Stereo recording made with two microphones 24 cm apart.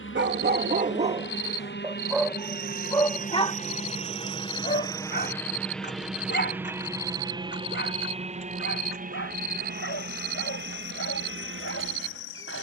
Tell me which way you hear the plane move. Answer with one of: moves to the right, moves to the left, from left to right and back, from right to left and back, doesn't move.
moves to the right.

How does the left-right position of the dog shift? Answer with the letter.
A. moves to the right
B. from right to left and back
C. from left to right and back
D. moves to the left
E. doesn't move
D.